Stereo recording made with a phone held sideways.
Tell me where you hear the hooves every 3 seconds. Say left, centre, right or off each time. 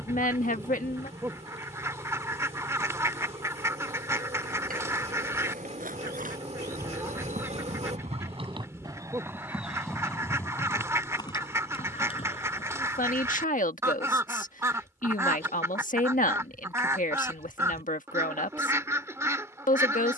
off, right, right, centre, left, off, off.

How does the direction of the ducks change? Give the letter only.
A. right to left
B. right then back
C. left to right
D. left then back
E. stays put
E.